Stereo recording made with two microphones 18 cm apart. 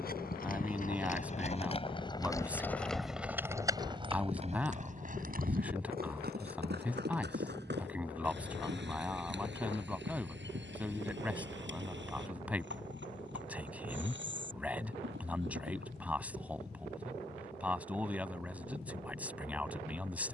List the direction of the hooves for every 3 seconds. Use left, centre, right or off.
left, right, right, right, right, right, off.